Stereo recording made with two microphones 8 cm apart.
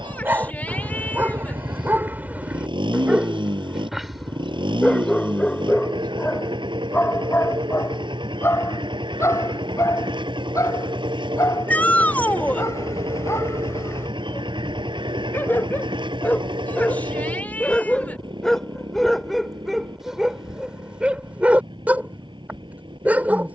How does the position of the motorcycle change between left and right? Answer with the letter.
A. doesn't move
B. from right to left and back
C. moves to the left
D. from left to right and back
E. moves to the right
A.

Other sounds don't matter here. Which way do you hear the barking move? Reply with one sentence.
In this clip you hear the barking go left and come back.